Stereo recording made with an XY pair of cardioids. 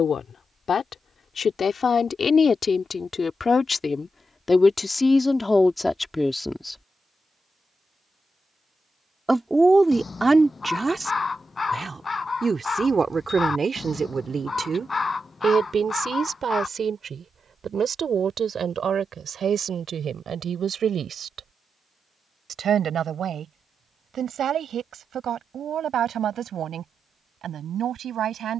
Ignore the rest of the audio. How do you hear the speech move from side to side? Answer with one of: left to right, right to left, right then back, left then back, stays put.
left to right.